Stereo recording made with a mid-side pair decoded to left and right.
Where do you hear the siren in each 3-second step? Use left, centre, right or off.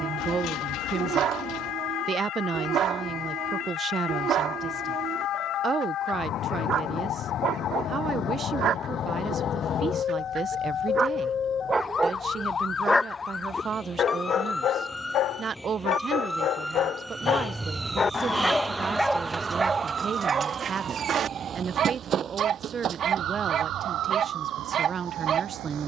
left, left, left, left, left, centre, right, right, right.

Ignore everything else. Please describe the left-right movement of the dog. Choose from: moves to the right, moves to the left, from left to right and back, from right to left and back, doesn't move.
from right to left and back.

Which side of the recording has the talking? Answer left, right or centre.
right.